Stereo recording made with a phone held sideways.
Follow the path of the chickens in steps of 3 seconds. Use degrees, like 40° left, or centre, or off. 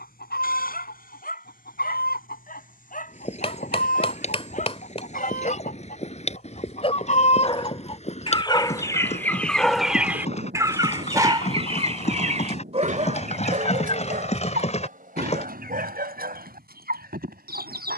70° left, 70° left, 40° left, 20° right, 50° right, 70° right.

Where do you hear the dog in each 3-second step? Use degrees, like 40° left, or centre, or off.
60° left, 50° left, 30° left, 10° right, 50° right, 70° right.